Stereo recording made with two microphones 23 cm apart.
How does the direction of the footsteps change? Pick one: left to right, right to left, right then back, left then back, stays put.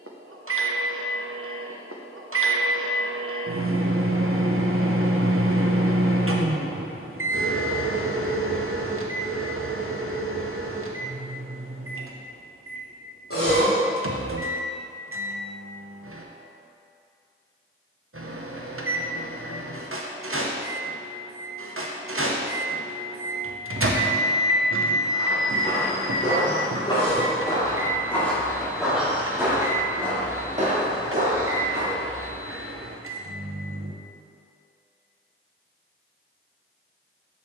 left to right.